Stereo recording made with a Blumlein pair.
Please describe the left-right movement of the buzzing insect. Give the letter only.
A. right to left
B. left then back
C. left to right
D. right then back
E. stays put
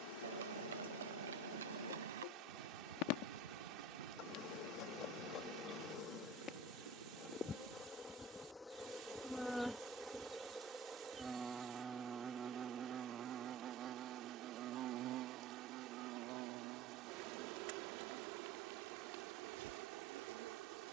C.